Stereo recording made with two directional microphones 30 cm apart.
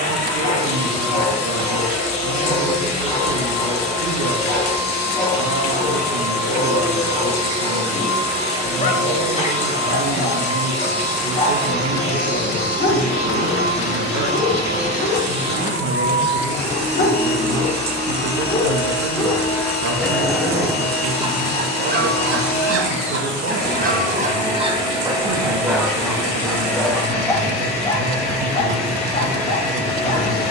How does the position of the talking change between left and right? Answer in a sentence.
In this clip you hear the talking stay put.